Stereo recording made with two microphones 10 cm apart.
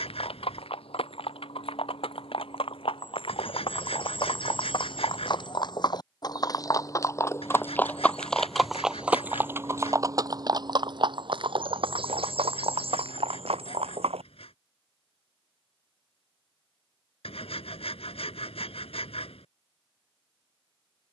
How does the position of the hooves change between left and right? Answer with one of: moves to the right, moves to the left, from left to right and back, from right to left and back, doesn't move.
moves to the right.